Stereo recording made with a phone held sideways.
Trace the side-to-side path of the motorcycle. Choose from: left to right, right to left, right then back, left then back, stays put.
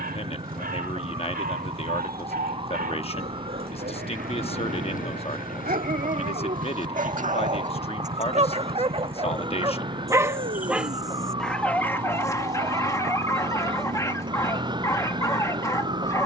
stays put.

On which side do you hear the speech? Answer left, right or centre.
left.